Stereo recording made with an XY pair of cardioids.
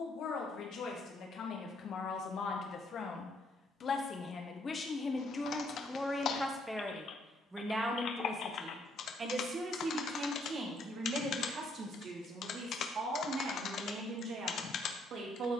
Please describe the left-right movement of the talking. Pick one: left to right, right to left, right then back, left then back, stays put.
left to right.